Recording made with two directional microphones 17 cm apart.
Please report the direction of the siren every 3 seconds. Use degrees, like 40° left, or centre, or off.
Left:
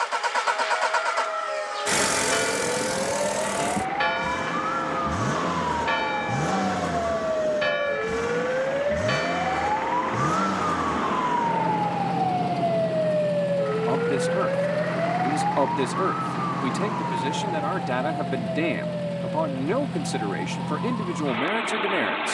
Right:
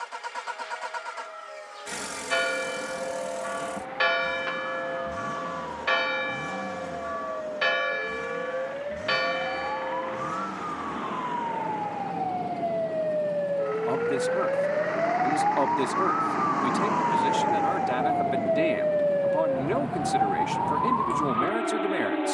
70° left, 60° left, 50° left, 40° left, 10° left, 20° right, 50° right, 60° right.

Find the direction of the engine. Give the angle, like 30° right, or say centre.
60° left.